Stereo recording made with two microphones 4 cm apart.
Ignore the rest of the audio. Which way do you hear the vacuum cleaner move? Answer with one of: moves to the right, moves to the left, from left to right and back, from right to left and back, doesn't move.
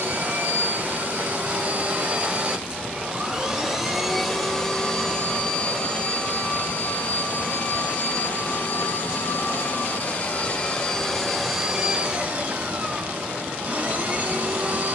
from right to left and back.